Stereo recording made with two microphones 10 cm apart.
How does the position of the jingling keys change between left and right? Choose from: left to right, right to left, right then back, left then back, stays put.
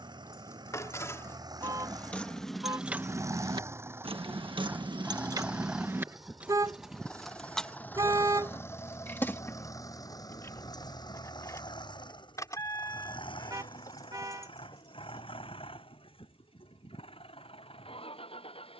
right then back.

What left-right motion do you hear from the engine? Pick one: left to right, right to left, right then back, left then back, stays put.
right to left.